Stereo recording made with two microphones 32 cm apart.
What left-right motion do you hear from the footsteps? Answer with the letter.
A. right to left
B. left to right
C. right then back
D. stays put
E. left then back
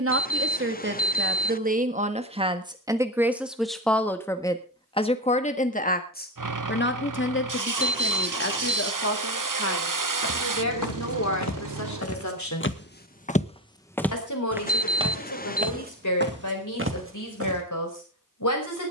B.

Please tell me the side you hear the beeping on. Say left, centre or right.
left.